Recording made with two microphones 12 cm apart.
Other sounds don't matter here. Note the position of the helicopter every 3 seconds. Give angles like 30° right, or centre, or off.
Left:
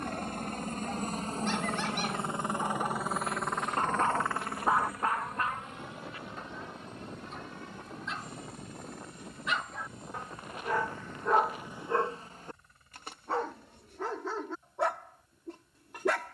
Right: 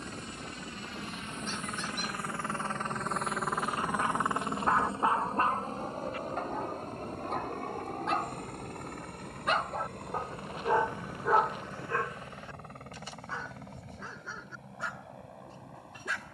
30° left, 20° right, 50° right, 60° right, 60° right, 70° right.